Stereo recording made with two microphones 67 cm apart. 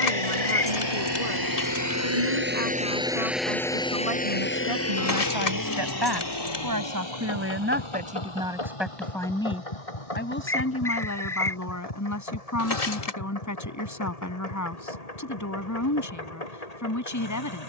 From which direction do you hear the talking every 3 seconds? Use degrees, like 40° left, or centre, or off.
70° right, 50° right, 20° right, 20° left, 30° left, 30° left.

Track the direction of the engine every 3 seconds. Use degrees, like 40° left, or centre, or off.
30° right, 10° left, 40° left, 60° left, 60° left, 70° left.